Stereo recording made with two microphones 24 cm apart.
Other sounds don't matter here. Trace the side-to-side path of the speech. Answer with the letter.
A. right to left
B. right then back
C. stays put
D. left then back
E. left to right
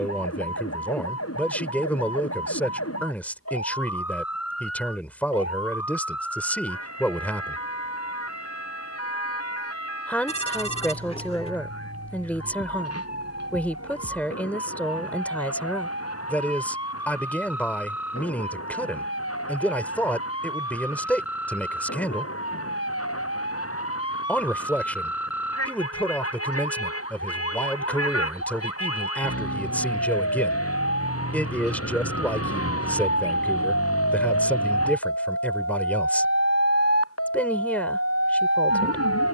C.